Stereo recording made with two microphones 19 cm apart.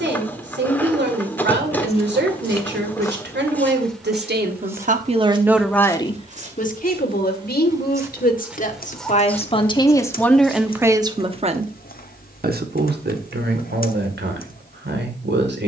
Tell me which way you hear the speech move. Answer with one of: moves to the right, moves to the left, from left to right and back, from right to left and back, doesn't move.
from right to left and back.